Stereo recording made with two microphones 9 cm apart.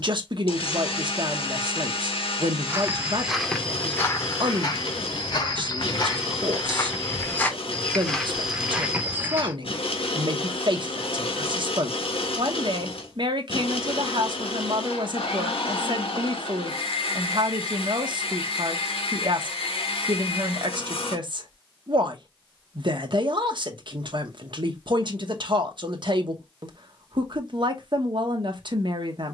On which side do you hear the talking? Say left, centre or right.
right.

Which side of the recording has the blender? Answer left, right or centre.
left.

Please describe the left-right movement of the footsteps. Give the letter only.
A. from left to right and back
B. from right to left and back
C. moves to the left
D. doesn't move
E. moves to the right
B.